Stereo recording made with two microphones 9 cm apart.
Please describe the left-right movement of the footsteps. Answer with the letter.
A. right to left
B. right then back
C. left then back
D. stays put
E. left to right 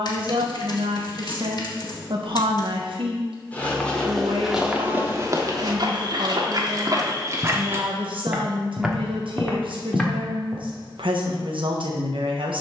B.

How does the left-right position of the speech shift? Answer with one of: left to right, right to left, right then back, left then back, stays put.
stays put.